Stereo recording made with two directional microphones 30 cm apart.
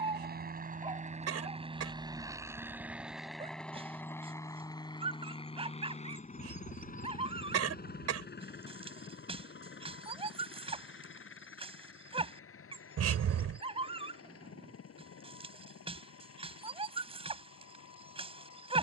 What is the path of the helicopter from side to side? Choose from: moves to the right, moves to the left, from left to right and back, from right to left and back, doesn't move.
moves to the left.